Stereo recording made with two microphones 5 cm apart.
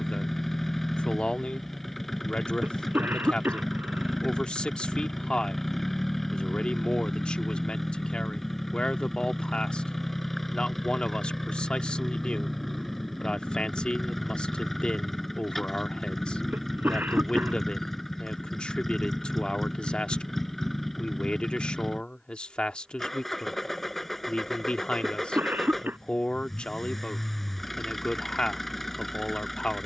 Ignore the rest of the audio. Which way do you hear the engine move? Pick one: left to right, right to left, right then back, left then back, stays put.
stays put.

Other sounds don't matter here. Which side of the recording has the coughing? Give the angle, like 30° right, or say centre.
30° right.